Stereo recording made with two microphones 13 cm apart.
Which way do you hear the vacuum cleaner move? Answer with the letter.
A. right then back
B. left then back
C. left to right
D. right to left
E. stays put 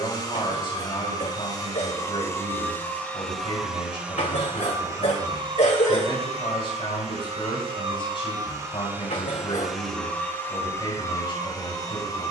A.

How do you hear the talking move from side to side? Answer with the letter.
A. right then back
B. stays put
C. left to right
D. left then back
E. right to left
B.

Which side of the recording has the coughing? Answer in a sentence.
In this clip you hear the coughing on the left.